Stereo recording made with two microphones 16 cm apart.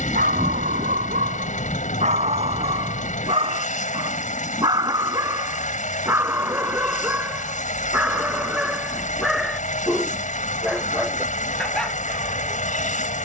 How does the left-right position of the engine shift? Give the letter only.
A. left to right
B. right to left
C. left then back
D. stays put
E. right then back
D.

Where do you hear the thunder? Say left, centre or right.
centre.